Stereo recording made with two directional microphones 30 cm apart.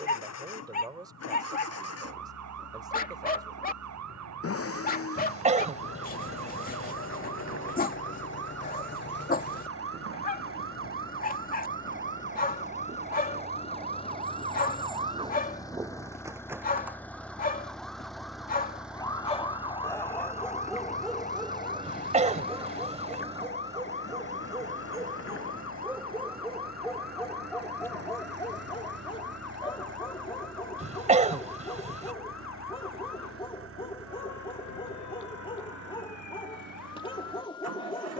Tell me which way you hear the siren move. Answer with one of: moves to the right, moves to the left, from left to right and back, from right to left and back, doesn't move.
moves to the left.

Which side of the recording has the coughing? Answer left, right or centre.
right.